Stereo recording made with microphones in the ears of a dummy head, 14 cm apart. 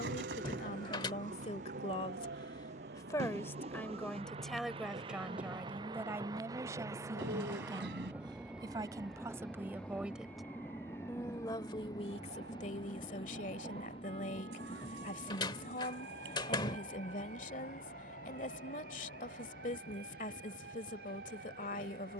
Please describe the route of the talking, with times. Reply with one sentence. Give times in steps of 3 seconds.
You can hear the talking on the left from 0 s, in the centre from 3 s, on the right from 6 s, in the centre from 9 s and on the left from 12 s.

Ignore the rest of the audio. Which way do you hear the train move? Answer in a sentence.
In this clip you hear the train move from right to left.